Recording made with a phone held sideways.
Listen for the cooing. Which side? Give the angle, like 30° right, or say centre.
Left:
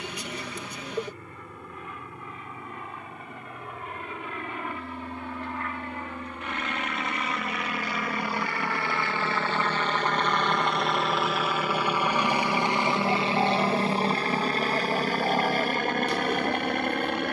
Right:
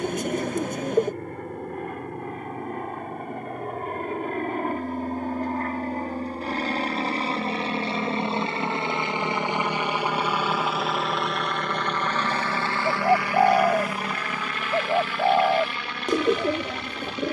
50° right.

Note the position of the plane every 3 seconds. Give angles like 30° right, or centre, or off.
60° right, 50° right, 30° right, 10° right, 20° left, 50° left.